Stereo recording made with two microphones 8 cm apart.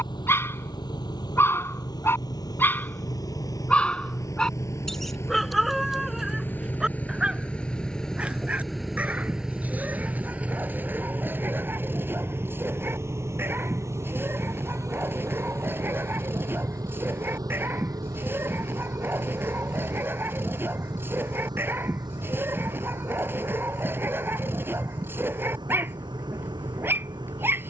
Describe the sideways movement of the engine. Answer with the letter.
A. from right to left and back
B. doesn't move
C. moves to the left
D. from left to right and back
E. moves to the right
E.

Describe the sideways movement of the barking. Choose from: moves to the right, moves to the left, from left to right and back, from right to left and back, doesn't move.
moves to the right.